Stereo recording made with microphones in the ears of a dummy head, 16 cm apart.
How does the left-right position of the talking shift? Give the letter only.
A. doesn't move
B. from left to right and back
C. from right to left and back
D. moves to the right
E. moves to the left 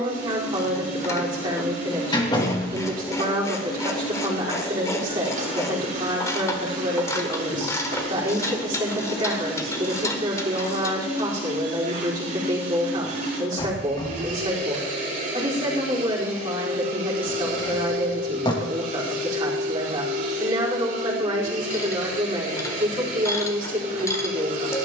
A.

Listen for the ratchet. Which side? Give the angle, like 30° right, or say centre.
20° left.